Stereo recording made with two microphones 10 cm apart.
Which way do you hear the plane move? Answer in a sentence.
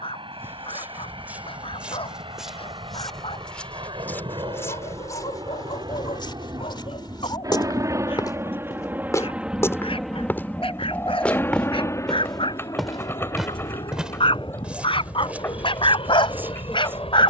You can hear the plane go from the right side to the left.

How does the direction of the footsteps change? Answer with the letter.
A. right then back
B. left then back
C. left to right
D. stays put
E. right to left
B.